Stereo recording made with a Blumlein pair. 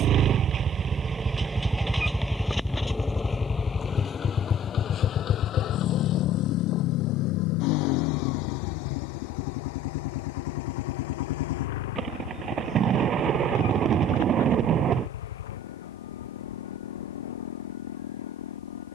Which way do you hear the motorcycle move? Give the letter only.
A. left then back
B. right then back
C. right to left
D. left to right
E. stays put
C.